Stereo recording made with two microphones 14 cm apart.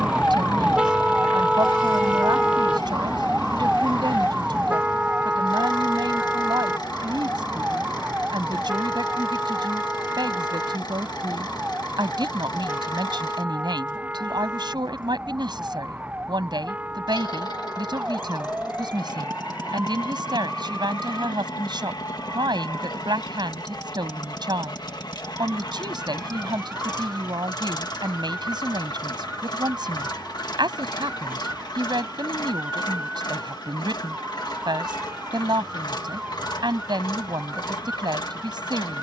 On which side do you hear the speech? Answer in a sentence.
In this clip you hear the speech on the right.